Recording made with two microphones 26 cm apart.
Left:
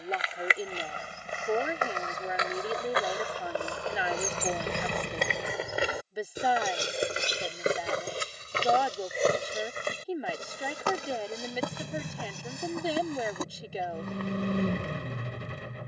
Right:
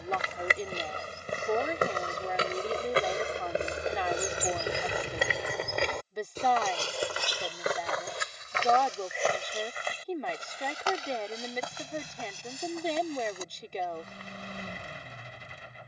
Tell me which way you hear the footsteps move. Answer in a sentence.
In this clip you hear the footsteps travel towards the left.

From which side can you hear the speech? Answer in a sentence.
You can hear the speech in the centre.